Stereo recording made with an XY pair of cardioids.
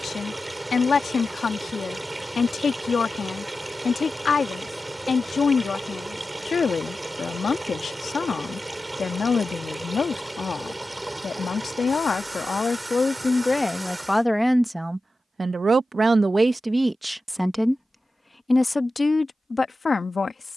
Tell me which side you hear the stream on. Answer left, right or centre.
centre.